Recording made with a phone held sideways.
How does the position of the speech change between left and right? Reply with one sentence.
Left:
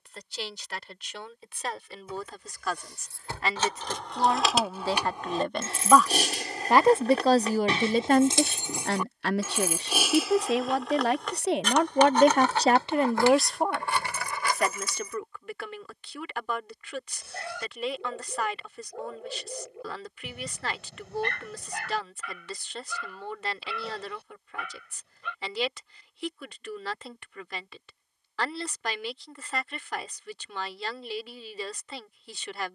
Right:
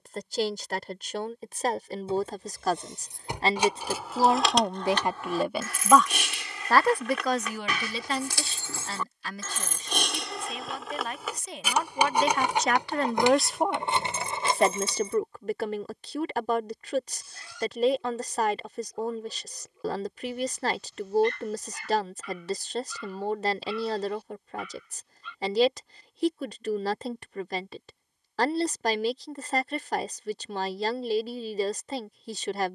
You can hear the speech move from right to left and back again.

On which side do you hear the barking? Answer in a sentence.
In this clip you hear the barking on the left.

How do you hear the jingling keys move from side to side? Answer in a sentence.
You can hear the jingling keys go left and come back.